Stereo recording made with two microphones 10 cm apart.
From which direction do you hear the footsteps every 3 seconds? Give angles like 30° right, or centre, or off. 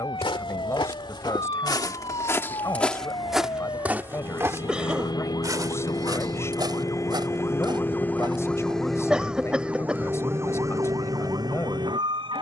40° left, 20° right, 50° right, off.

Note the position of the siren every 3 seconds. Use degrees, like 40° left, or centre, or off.
60° left, 50° left, 30° left, 30° right.